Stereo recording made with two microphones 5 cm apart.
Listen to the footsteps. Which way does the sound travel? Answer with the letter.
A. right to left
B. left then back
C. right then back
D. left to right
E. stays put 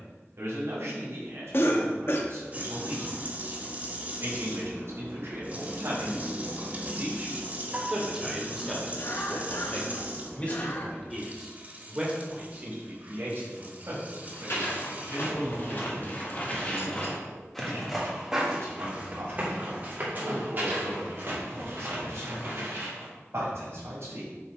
D.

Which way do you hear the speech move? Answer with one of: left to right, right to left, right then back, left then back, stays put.
left then back.